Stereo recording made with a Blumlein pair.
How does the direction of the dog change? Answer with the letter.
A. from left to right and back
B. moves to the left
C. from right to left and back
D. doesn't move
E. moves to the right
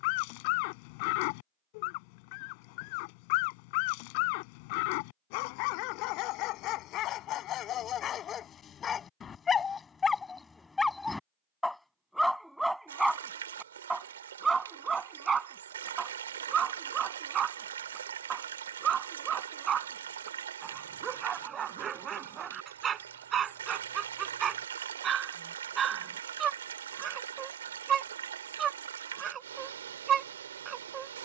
E.